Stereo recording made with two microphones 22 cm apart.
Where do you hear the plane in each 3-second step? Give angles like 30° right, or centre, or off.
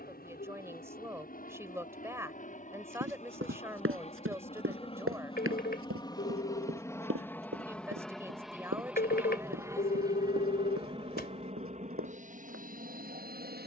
40° left, 30° left, 10° left, 20° right, 40° right.